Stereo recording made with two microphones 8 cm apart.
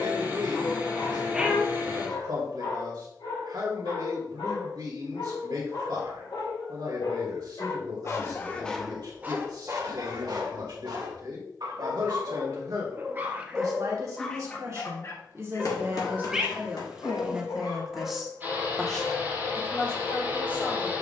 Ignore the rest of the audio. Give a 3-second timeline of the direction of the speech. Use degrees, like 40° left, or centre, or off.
60° right, 60° right, 60° right, 60° right, 50° right, 20° right, 10° left.